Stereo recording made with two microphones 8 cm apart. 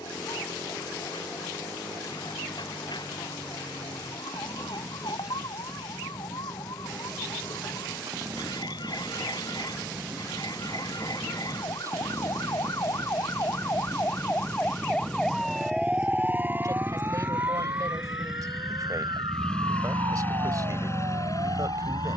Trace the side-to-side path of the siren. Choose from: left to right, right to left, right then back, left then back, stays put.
left to right.